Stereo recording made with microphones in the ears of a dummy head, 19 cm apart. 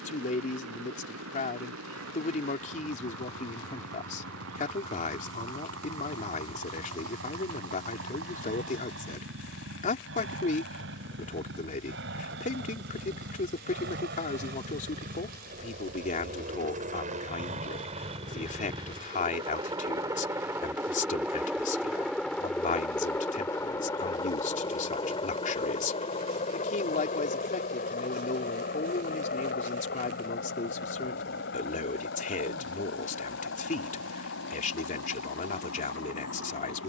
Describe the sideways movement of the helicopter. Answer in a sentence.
You can hear the helicopter go from the right side to the left.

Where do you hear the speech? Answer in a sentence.
You can hear the speech on the left.